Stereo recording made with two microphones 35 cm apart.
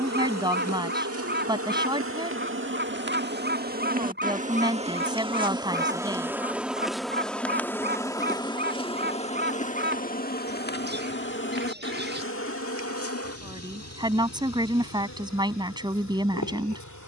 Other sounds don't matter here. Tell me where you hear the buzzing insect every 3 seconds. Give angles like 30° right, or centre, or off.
40° right, 20° right, centre, 30° left, 40° left, 50° left.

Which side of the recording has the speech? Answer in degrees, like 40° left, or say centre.
10° right.